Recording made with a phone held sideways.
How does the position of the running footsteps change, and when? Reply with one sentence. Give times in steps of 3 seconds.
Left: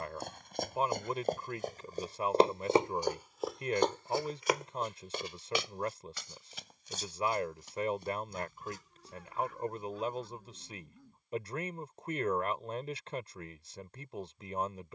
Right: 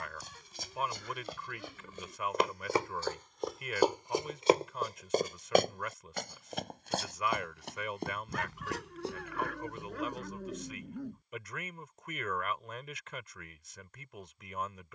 You can hear the running footsteps on the left from 0 s, on the right from 3 s and not at all from 12 s.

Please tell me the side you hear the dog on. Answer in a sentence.
In this clip you hear the dog on the right.